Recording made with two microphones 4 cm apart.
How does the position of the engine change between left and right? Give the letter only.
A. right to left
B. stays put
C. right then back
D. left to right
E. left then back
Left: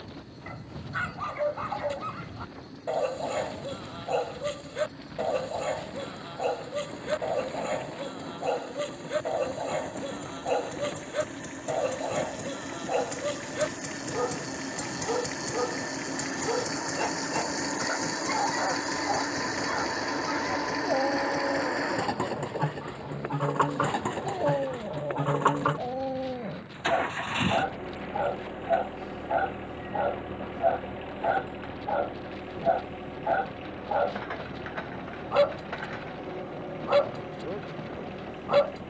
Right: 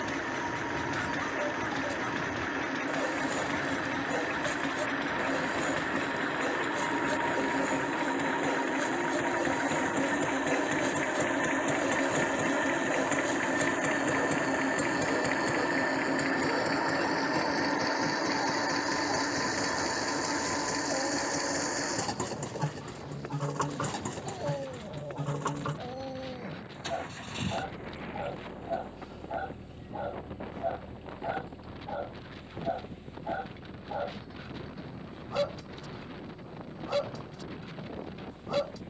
A.